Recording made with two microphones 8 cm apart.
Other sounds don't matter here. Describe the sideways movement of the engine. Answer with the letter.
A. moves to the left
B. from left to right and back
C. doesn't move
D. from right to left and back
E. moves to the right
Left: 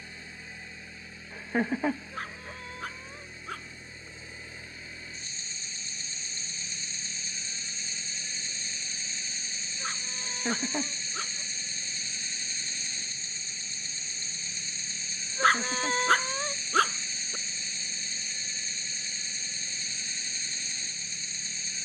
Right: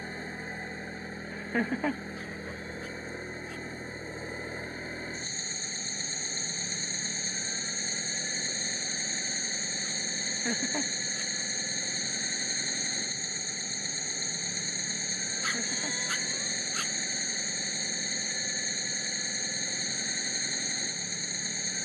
C.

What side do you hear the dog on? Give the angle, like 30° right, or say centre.
60° left.